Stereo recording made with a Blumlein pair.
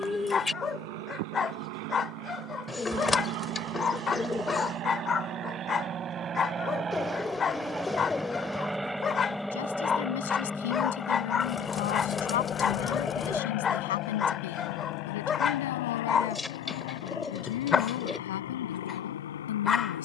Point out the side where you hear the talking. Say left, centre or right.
left.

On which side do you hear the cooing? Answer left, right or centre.
centre.